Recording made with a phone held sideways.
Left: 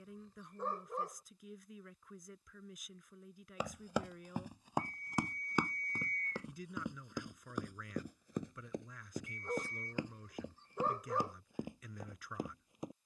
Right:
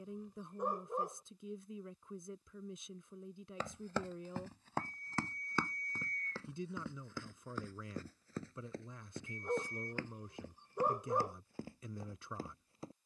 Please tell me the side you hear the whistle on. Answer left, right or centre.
left.